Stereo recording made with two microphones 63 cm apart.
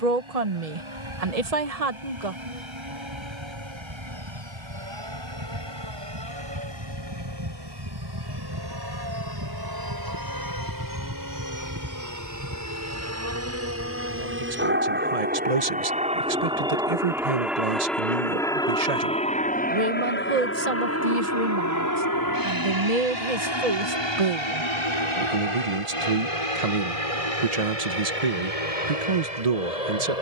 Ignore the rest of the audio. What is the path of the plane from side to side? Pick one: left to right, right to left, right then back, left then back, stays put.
right to left.